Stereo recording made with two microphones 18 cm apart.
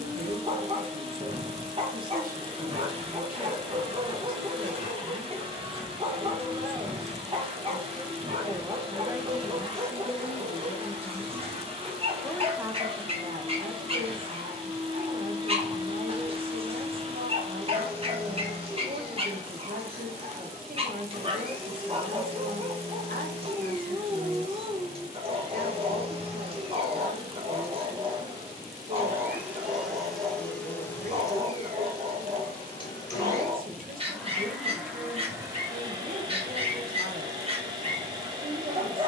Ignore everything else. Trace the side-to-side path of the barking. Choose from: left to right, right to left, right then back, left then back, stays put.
stays put.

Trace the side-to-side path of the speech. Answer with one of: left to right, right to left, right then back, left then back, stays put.
left then back.